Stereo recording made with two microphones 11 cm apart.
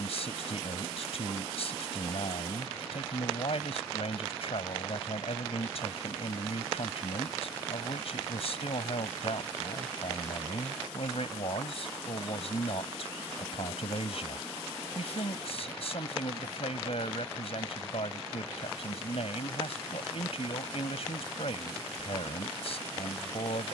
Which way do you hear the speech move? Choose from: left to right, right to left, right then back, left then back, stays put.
stays put.